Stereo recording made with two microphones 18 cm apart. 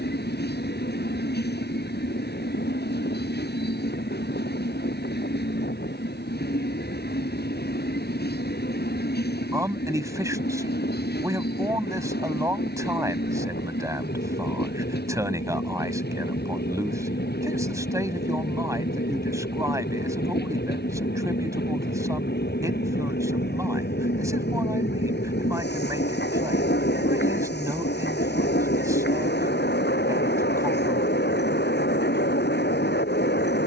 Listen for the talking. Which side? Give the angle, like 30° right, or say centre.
20° right.